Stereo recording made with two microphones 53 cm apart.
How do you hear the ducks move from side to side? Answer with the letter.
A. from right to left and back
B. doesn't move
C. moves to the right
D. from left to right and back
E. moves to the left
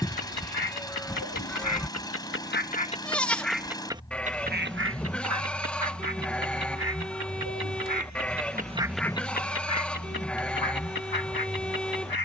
D.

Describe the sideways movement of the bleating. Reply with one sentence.
In this clip you hear the bleating stay put.